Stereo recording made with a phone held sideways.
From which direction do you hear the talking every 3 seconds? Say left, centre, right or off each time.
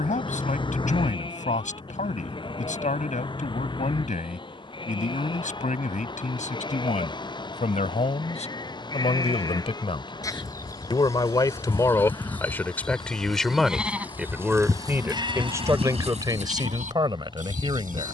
left, left, left, left, centre, right.